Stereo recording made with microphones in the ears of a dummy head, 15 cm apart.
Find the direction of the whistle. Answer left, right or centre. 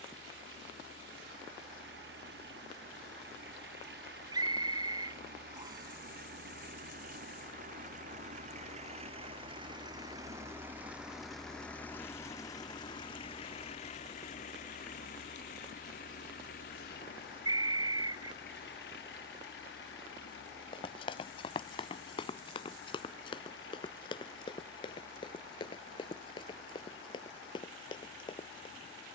right.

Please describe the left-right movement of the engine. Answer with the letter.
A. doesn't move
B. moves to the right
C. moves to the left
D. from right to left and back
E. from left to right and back
C.